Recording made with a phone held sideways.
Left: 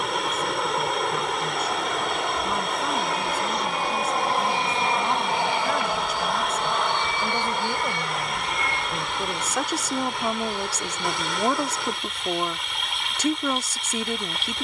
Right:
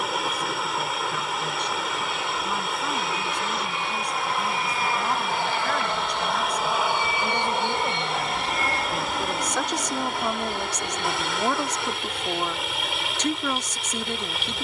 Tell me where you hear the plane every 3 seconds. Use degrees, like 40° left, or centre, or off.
60° left, 30° left, 20° right, 50° right, 60° right.